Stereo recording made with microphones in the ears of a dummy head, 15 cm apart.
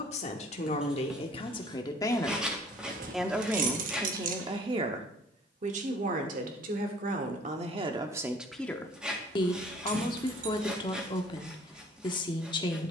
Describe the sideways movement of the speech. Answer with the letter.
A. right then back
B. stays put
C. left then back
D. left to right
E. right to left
A.